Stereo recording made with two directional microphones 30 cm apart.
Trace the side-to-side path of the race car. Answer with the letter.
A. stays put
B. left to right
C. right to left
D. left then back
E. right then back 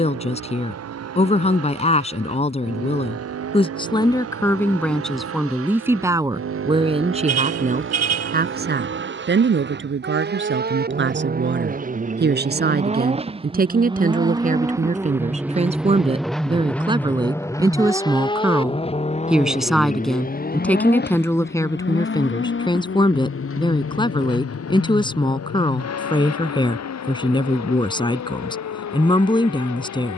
C.